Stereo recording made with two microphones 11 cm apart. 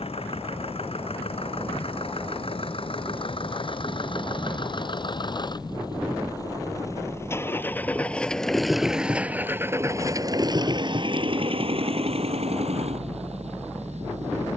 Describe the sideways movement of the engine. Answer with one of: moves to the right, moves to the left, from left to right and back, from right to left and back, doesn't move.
moves to the right.